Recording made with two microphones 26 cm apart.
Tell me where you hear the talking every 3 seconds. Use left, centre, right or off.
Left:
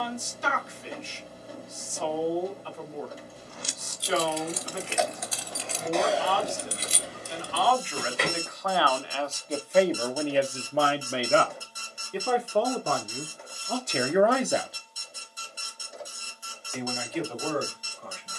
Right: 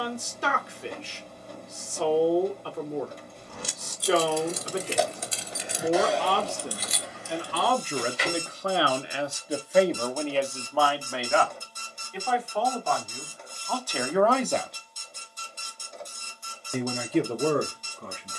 right, right, right, centre, left, right.